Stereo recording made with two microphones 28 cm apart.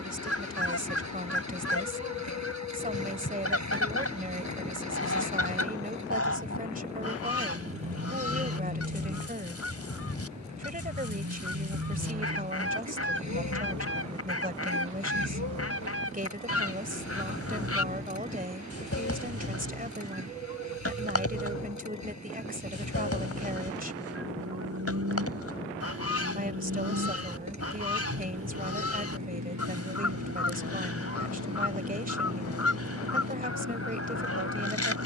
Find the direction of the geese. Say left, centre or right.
left.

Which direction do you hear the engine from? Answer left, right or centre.
right.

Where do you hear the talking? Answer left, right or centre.
right.